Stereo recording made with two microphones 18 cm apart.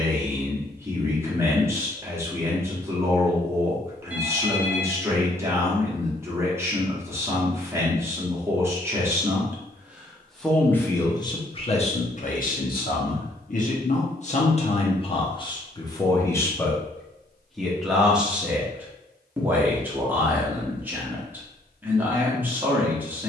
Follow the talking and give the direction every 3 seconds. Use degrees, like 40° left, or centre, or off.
10° right, 10° right, 10° right, 10° left, 50° left, 20° left, 10° right, 10° right.